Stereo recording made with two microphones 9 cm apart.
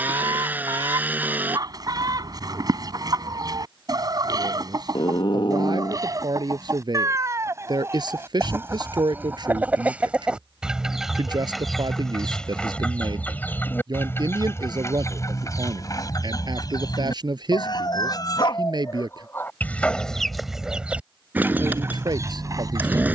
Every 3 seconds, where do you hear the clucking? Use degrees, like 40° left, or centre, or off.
40° right, 40° right, 30° right, 10° right, 20° left, 40° left, 20° left, 30° right.